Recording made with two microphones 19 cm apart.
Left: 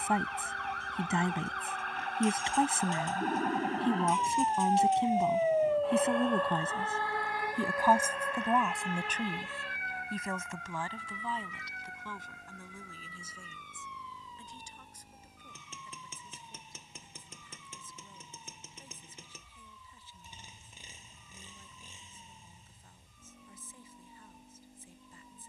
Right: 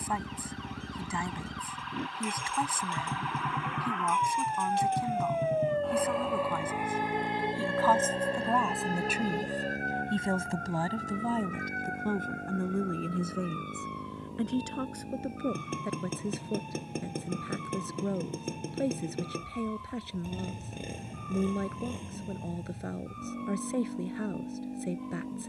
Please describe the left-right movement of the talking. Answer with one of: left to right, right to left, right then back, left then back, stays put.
left to right.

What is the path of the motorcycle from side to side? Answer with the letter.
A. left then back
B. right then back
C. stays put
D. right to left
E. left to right
C.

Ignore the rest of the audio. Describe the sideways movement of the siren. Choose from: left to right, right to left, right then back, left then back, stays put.
left to right.